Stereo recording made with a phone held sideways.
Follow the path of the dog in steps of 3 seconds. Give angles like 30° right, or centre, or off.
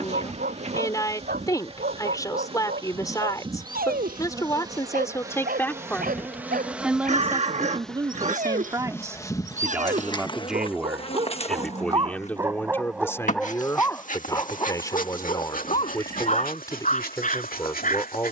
80° right, 80° right, 70° right, 40° right, 10° left, 50° left.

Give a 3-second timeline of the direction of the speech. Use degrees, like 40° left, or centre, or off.
20° left, 20° left, 20° right, centre, 20° left, 20° left.